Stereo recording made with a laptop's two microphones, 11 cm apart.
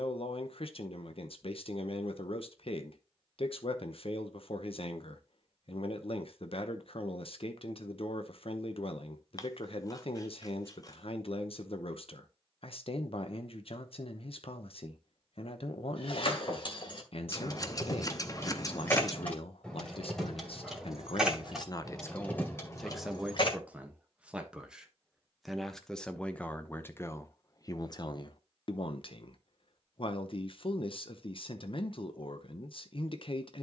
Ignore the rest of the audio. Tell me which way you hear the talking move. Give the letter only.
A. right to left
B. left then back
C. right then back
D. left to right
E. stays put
C.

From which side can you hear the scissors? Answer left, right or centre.
left.